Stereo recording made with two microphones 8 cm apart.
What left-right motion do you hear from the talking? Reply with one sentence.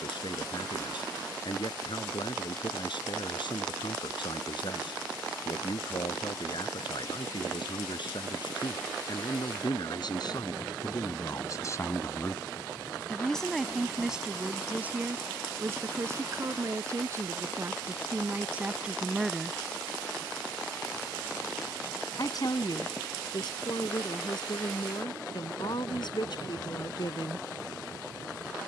You can hear the talking go right and come back.